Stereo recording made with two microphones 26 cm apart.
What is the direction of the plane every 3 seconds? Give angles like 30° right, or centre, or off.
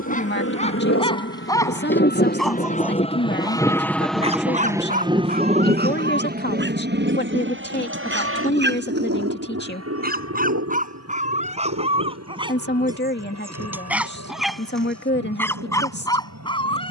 50° left, centre, 40° right, 60° right, 60° right, 70° right.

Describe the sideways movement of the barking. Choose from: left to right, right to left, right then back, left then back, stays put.
right then back.